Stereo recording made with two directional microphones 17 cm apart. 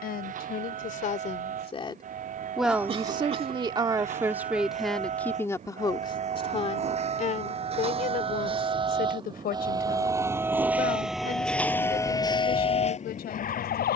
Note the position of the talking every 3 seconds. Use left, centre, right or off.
left, centre, left, left, left.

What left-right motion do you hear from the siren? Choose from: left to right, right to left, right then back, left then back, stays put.
right to left.